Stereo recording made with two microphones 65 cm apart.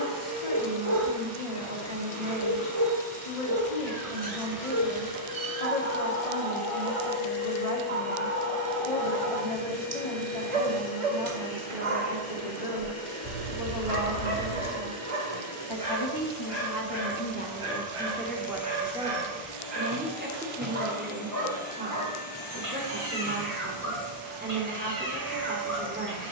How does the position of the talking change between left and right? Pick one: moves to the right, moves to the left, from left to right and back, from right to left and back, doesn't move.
moves to the right.